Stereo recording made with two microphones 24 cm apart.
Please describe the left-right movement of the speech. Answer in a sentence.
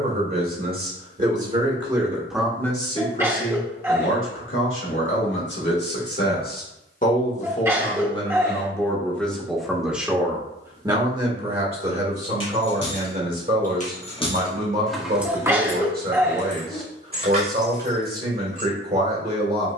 In this clip you hear the speech move from right to left and back again.